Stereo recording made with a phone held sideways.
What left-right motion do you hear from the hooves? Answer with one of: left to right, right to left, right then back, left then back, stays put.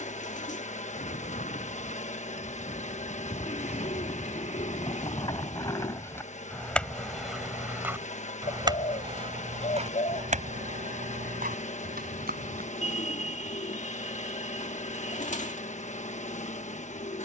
left to right.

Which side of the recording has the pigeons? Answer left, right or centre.
left.